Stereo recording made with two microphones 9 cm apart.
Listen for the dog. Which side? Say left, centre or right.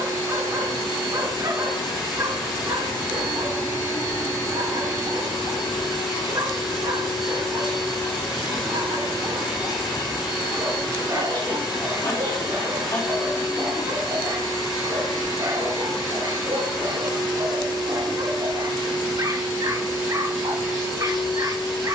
right.